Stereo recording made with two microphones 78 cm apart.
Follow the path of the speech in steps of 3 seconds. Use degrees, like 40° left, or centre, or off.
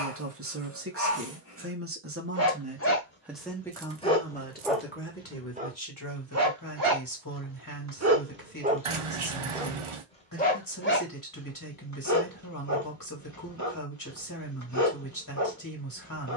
20° right, 10° left, 20° left, 20° left, 20° left, 20° left.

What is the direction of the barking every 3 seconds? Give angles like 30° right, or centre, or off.
20° left, centre, 20° right, 10° left, 20° left, 20° left.